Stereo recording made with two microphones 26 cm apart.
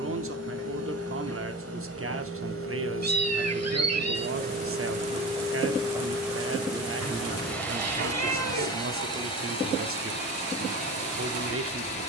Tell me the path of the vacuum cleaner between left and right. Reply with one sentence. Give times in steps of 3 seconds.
You can hear the vacuum cleaner on the right from 0 s, in the centre from 6 s and on the left from 9 s.